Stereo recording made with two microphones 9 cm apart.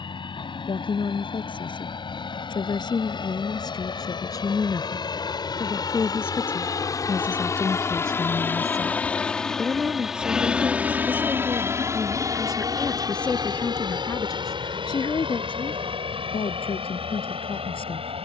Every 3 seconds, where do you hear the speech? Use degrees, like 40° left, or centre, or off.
60° left, 40° left, 10° left, 10° right, 20° left, 70° left.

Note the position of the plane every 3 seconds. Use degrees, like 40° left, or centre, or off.
70° left, 60° left, 30° left, 10° right, 40° right, 60° right.